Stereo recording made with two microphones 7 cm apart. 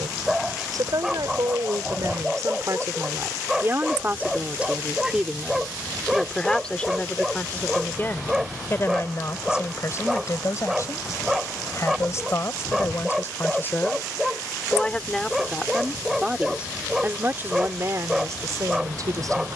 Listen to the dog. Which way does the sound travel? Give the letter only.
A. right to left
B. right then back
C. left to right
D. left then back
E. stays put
E.